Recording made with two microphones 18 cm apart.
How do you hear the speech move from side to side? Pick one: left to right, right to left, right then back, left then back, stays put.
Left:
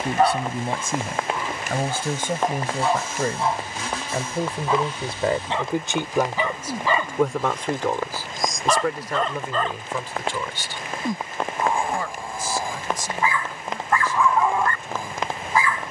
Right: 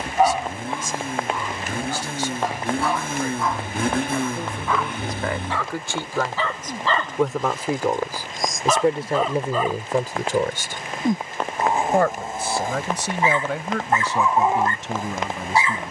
left to right.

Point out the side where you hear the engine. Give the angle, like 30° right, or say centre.
50° right.